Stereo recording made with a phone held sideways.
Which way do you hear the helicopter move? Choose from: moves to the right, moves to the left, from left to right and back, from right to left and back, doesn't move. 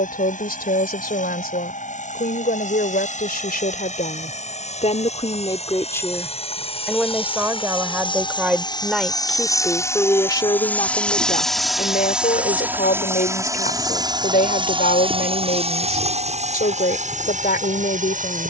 moves to the right.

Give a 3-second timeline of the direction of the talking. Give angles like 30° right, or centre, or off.
80° left, 50° left, 10° right, 30° left, 70° left, 70° left.